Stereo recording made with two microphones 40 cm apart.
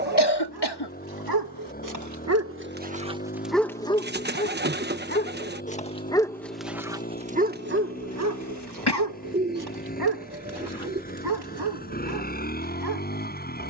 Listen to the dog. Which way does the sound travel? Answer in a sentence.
In this clip you hear the dog go left and come back.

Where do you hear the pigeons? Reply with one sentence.
You can hear the pigeons on the right.